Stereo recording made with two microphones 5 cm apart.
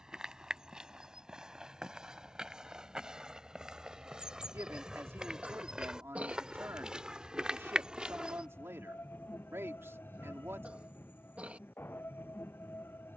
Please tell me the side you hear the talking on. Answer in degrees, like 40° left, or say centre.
70° right.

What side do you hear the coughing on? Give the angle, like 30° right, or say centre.
30° right.